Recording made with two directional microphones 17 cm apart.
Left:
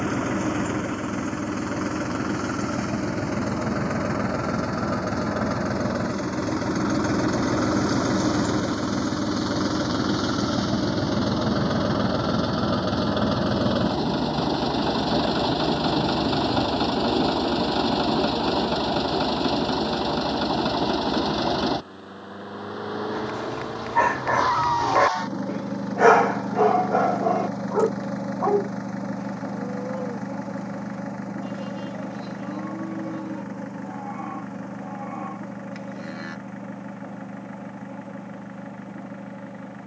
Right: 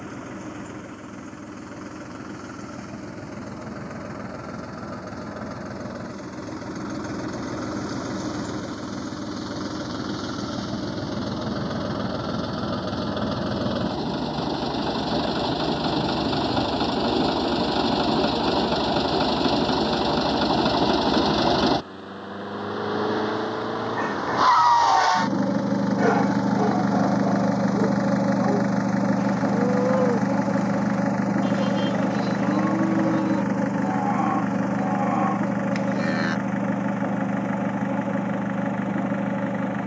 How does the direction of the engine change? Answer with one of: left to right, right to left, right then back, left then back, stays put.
left to right.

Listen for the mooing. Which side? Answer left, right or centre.
right.